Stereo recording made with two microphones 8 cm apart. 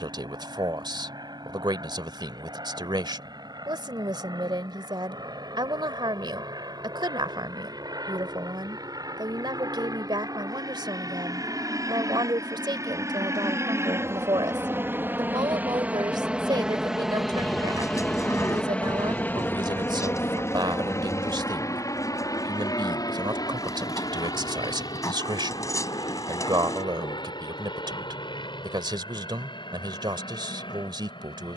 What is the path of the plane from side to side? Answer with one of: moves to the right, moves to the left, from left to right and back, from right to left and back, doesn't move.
moves to the left.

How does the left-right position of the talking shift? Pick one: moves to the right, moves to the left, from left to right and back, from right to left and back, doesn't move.
doesn't move.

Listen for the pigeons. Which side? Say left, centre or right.
left.